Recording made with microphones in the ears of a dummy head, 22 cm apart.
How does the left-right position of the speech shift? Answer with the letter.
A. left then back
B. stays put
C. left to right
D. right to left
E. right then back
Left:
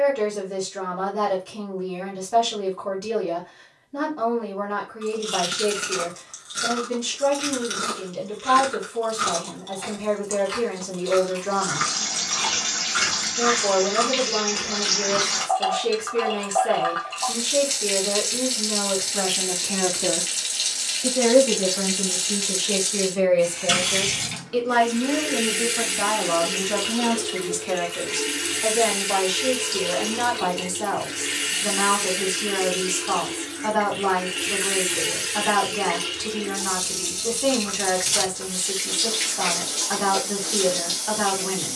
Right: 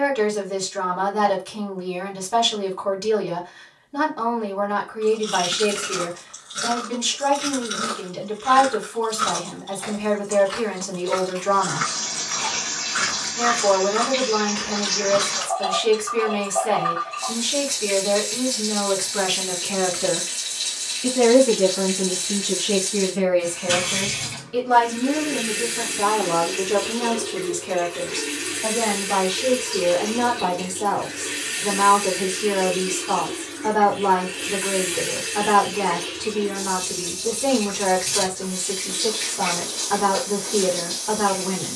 D.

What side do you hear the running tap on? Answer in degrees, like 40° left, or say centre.
70° left.